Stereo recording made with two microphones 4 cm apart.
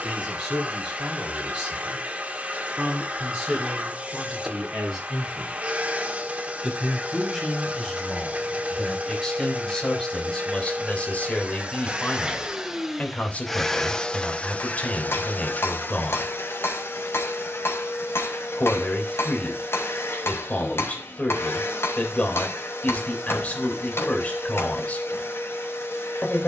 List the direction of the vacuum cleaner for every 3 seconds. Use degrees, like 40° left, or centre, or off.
30° right, 30° right, 30° right, 30° right, 10° left, 60° left, 80° left, 80° left, 80° left.